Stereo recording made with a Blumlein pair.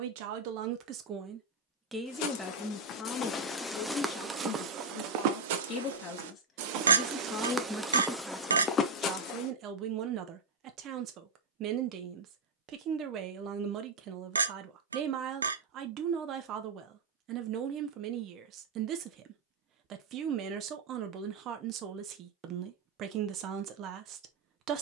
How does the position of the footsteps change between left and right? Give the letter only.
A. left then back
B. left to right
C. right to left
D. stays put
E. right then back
E.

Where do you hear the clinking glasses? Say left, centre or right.
right.